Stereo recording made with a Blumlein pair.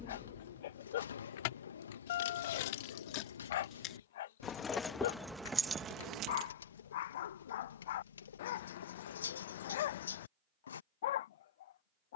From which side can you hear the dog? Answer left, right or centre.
left.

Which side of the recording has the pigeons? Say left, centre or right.
left.